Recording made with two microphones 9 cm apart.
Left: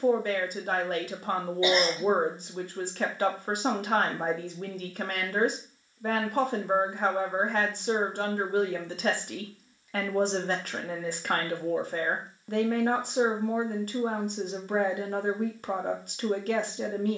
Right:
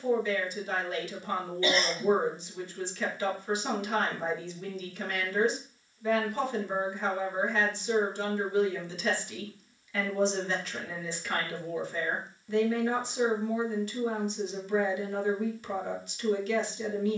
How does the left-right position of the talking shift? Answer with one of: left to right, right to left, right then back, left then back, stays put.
stays put.